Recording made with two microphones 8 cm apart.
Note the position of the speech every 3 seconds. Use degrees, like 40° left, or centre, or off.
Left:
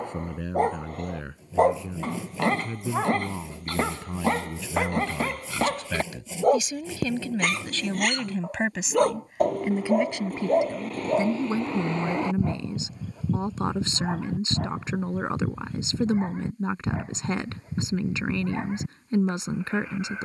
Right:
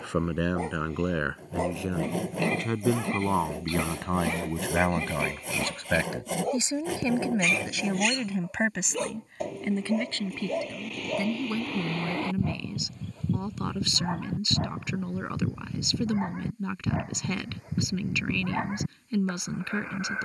80° right, 60° right, 10° right, 20° left, 30° left, 30° left, 30° left.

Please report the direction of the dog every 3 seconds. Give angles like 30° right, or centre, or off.
50° left, 50° left, 50° left, 40° left, 10° left, 10° right, 20° right.